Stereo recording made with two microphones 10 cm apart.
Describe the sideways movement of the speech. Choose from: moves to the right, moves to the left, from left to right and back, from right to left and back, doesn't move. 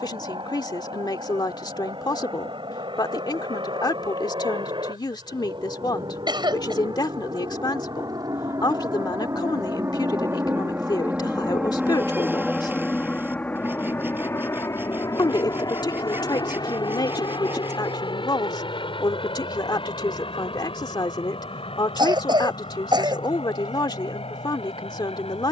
doesn't move.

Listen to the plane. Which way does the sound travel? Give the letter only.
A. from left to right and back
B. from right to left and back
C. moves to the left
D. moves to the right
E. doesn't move
C.